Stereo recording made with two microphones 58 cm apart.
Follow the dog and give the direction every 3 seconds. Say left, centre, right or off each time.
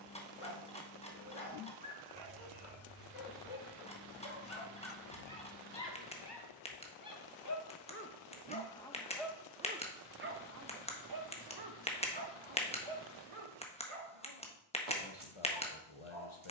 left, left, left, right, right, right.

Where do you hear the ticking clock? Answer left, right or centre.
centre.